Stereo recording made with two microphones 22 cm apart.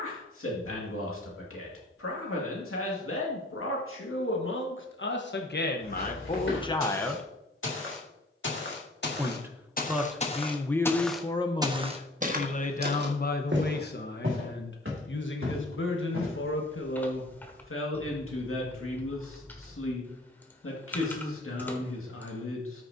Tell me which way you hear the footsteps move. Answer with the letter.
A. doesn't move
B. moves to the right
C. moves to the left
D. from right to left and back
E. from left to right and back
B.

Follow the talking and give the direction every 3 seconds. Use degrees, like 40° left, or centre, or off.
80° left, 60° left, 20° left, 10° left, 50° left, 70° left, 70° left, 70° left.